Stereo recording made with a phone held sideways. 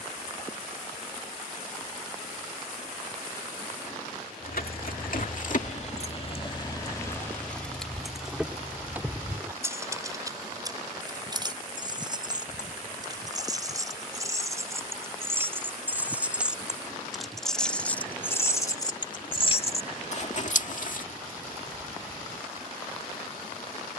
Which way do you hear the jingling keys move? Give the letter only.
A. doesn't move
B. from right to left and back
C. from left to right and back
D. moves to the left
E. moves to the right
C.